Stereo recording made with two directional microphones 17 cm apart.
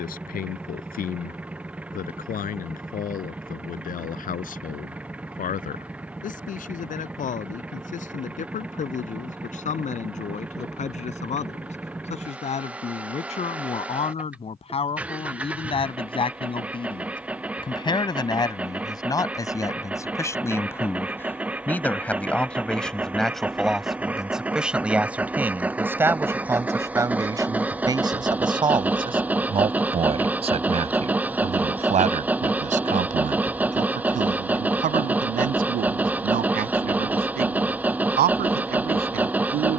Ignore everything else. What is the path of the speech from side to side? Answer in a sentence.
In this clip you hear the speech travel towards the right.